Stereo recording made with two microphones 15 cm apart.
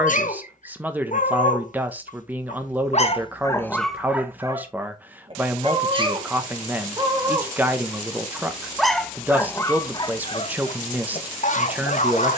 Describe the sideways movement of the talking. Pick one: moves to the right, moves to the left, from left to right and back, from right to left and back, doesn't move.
doesn't move.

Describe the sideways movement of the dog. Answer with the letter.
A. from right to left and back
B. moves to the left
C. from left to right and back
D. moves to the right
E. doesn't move
C.